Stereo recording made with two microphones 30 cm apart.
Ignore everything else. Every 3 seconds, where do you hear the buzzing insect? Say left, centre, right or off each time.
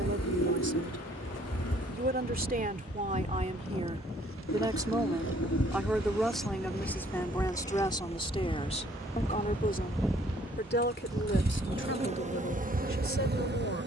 left, left, left, centre, right.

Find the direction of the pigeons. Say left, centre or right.
left.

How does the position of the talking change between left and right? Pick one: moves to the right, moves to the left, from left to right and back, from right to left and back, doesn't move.
moves to the left.